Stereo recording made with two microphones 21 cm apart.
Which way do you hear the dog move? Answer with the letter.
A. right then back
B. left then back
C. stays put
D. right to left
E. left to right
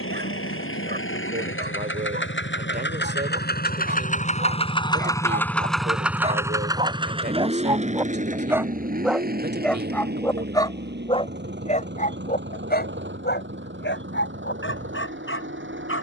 D.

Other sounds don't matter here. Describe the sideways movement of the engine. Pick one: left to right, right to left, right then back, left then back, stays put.
left to right.